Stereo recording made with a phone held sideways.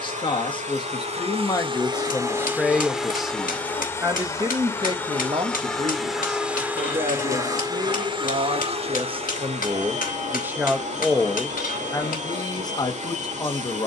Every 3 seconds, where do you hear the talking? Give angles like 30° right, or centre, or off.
20° left, 30° right, 50° right, 20° right, 30° left.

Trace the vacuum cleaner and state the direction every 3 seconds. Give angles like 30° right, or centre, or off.
40° right, 10° left, 20° right, 50° right, 50° right.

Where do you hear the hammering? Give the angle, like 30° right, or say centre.
80° left.